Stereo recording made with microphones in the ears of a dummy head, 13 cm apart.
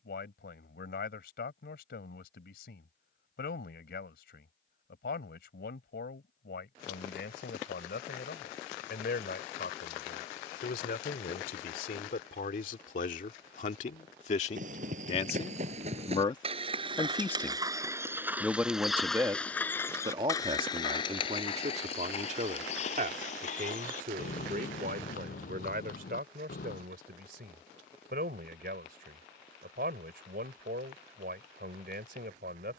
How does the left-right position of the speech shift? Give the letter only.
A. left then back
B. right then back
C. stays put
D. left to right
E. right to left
D.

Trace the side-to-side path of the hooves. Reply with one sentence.
In this clip you hear the hooves move to the left.